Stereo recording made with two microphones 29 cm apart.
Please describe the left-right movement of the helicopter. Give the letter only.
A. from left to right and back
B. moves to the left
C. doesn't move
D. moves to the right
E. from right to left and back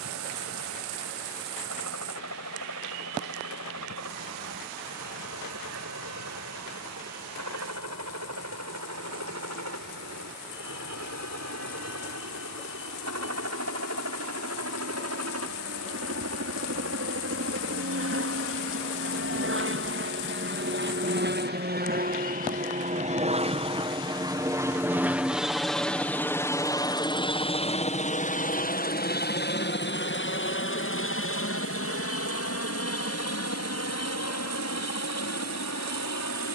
B.